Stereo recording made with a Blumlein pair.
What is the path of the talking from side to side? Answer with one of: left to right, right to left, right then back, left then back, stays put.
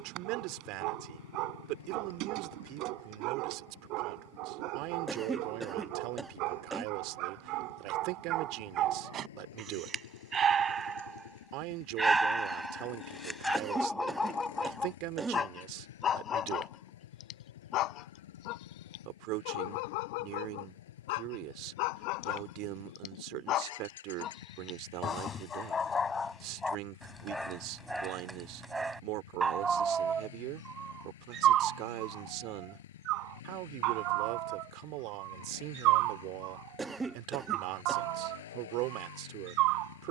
stays put.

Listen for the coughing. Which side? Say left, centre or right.
centre.